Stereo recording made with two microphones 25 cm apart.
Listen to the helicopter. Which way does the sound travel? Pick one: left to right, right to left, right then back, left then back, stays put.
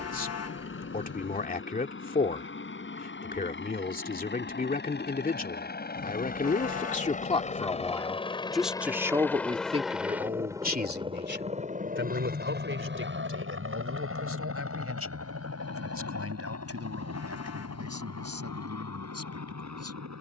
left to right.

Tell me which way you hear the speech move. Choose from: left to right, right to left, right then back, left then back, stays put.
left to right.